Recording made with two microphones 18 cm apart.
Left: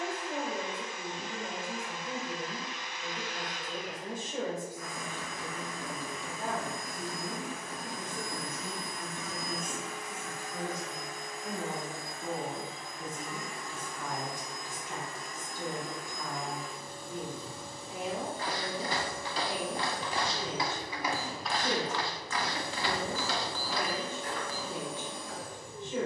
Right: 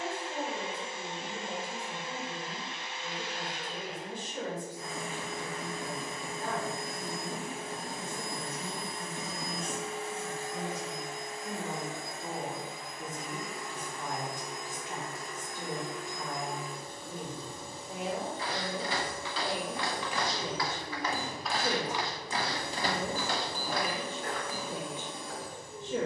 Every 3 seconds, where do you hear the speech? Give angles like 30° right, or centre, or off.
50° left, 50° left, 40° left, 20° left, 10° right, 30° right, 50° right, 50° right, 50° right.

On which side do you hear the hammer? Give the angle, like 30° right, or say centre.
20° right.